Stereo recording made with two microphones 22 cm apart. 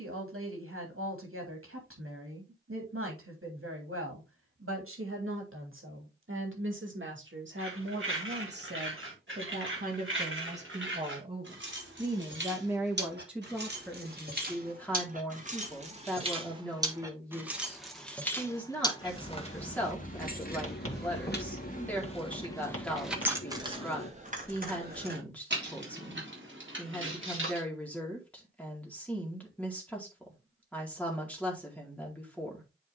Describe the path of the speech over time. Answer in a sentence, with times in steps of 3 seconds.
You can hear the speech on the right from 0 s and in the centre from 12 s.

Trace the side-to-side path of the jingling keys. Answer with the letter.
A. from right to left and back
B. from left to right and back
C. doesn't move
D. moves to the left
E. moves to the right
A.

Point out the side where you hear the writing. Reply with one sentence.
You can hear the writing on the left.